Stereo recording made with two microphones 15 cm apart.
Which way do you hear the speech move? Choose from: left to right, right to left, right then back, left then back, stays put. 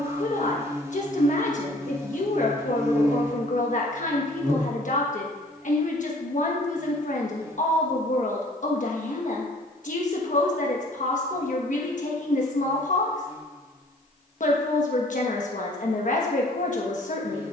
stays put.